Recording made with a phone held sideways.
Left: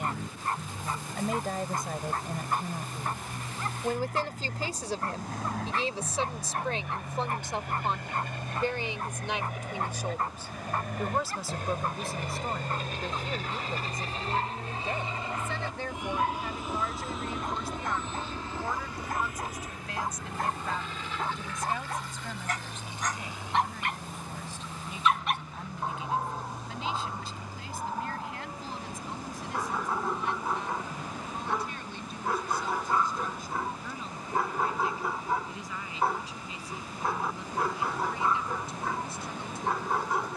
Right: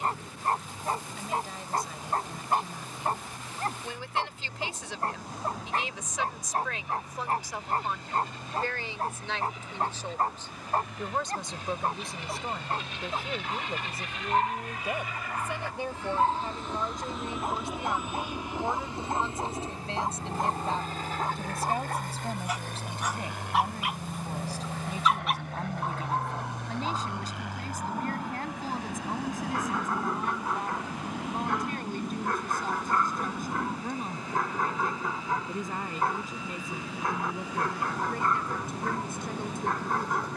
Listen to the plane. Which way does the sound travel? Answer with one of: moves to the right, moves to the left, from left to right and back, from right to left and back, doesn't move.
moves to the right.